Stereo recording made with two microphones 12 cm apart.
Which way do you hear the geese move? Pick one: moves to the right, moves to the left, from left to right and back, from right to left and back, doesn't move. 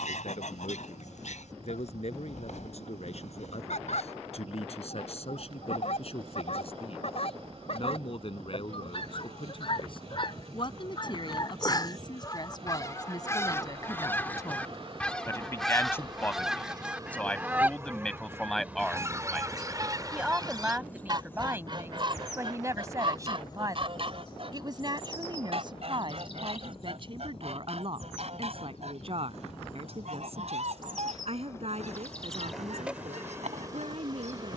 moves to the right.